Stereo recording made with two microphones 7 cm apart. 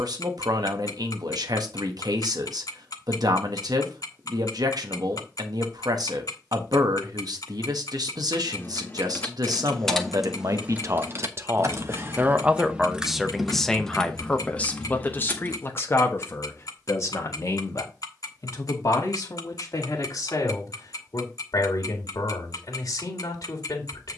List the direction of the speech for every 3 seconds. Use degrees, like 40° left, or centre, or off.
60° right, 60° right, 60° right, 50° right, centre, 40° left, 50° left, 60° left.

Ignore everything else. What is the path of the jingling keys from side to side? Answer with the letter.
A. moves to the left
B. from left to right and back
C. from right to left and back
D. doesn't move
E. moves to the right
B.